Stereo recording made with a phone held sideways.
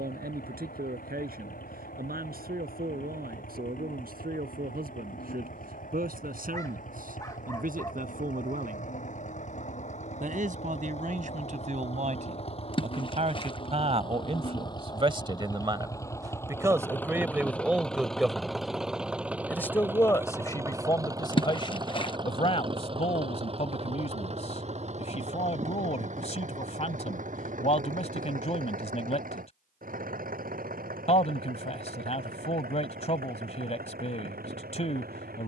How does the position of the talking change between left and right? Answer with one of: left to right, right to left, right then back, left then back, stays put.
right to left.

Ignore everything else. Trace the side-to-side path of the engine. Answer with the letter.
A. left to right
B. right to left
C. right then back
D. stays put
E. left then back
A.